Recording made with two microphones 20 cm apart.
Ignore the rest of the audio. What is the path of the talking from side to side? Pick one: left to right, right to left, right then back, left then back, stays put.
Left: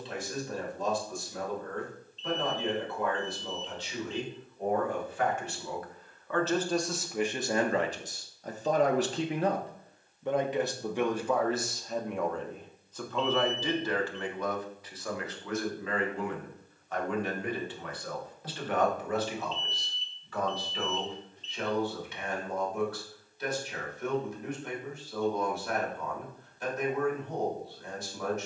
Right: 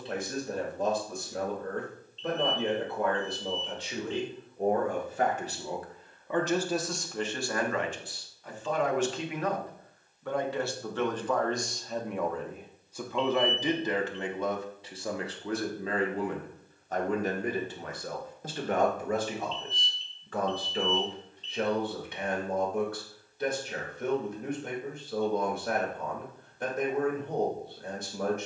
left then back.